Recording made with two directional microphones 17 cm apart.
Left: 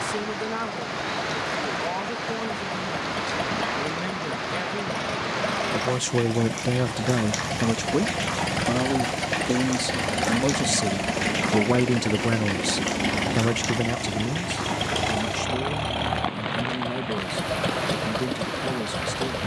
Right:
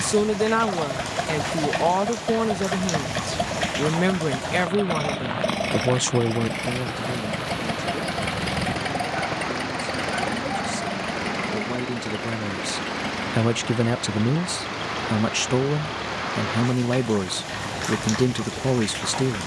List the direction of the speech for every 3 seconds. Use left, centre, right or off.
right, right, left, left, centre, right, right.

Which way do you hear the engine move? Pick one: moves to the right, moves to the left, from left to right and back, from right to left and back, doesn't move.
moves to the left.